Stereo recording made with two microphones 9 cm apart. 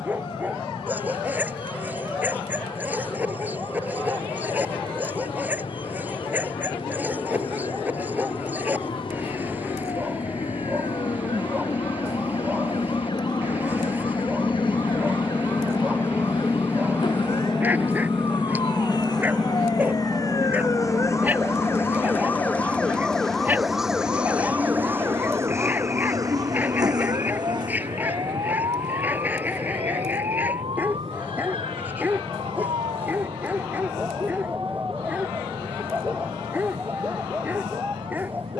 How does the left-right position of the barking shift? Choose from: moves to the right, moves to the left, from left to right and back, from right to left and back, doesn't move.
doesn't move.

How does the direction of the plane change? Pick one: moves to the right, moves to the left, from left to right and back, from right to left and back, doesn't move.
moves to the right.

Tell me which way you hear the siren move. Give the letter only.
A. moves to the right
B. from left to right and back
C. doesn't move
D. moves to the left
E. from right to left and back
A.